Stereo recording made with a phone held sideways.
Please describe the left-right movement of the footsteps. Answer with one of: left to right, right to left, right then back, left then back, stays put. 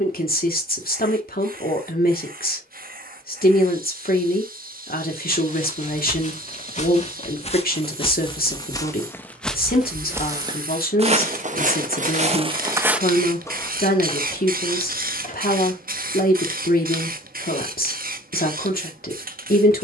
right then back.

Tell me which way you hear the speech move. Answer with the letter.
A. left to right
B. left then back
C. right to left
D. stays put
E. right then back
D.